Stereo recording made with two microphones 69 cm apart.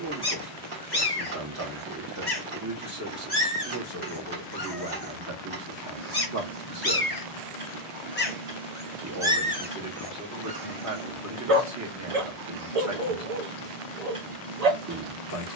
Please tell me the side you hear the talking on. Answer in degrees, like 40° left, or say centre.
20° right.